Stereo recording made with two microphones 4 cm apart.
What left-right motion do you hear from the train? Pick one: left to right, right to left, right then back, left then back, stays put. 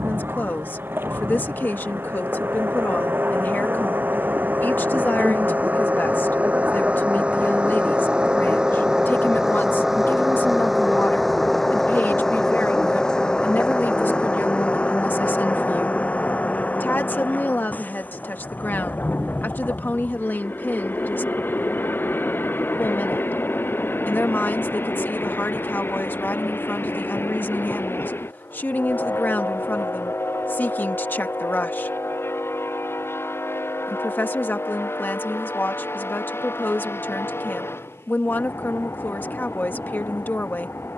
right to left.